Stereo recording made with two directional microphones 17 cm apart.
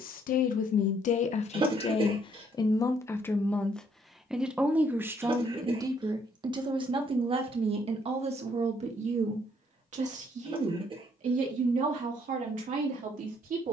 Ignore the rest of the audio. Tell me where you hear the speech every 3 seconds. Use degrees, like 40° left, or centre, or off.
40° left, 10° right, 30° right, 50° right, 50° right.